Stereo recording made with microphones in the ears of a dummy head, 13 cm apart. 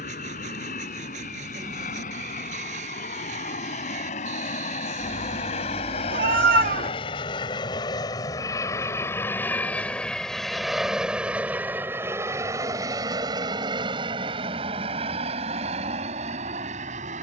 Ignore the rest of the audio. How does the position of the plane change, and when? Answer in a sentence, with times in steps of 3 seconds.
You can hear the plane on the left from 0 s, in the centre from 9 s and on the right from 12 s.